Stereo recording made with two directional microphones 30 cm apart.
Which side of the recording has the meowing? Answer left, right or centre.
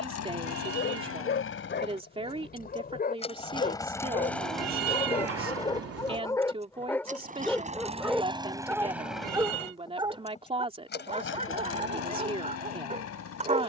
right.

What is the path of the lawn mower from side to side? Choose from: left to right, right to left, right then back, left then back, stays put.
right then back.